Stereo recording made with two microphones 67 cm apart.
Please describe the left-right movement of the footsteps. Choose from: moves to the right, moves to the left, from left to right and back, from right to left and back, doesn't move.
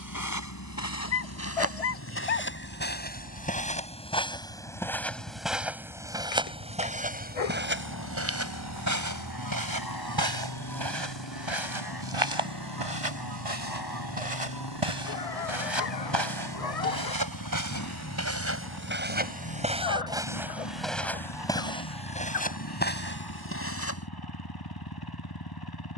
from left to right and back.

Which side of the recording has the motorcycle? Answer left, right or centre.
left.